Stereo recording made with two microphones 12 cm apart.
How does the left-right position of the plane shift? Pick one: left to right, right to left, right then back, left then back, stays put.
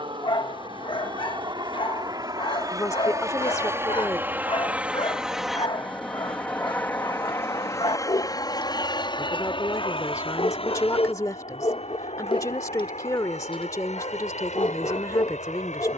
right to left.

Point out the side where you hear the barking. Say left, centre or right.
left.